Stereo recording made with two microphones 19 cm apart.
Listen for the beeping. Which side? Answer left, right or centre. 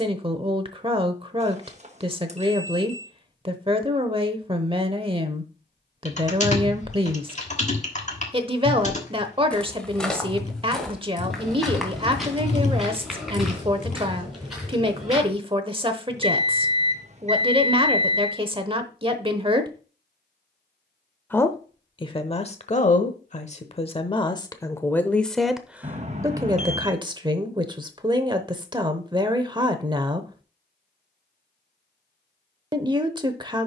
right.